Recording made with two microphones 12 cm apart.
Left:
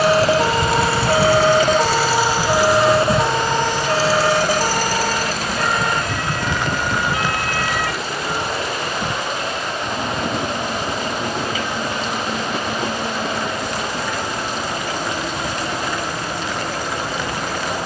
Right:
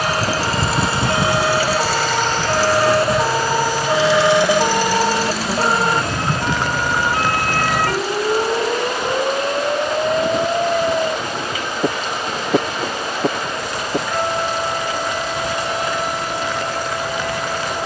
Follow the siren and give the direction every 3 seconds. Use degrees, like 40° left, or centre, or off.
20° left, 20° right, 40° right, 60° right, 70° right, 70° right.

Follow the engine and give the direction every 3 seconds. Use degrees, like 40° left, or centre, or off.
10° right, 40° left, 60° left, 70° left, 70° left, 70° left.